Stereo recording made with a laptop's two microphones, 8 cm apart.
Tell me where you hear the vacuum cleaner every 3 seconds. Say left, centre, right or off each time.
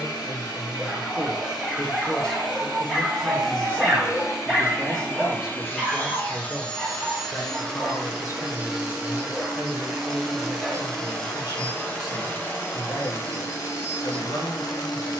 left, left, centre, centre, left.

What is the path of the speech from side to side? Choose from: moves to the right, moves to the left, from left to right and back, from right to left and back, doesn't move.
from left to right and back.